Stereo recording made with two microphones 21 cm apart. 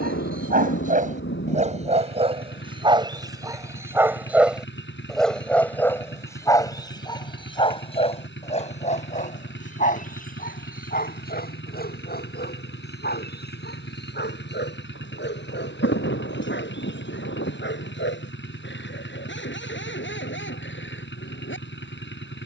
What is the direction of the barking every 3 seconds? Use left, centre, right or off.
right, centre, left, left, left, left, left, left.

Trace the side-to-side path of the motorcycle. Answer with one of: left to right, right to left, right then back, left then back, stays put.
stays put.